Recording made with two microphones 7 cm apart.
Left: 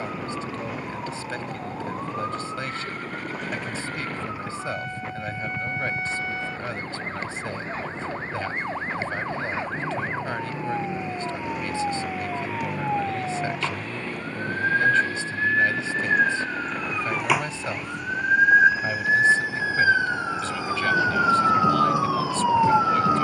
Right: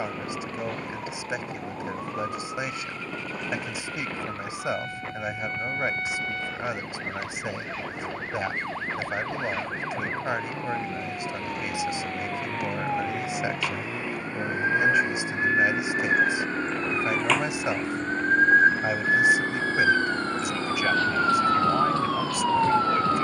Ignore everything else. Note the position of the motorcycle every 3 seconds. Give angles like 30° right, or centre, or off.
50° left, 50° left, 40° left, 20° left, 10° right, 30° right, 50° right, 60° right.